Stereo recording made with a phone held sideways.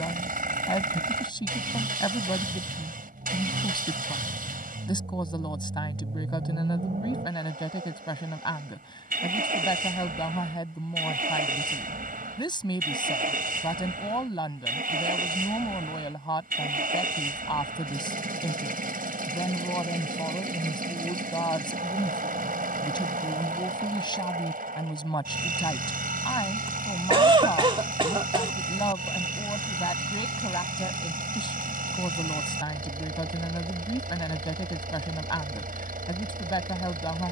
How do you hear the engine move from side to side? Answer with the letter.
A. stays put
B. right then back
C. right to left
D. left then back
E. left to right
A.